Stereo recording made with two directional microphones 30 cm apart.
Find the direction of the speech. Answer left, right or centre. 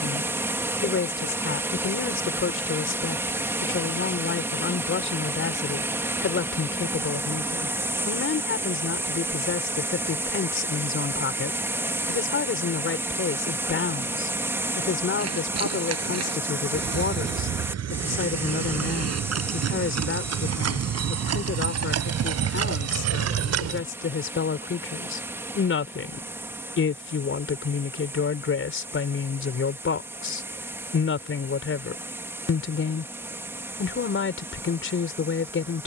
left.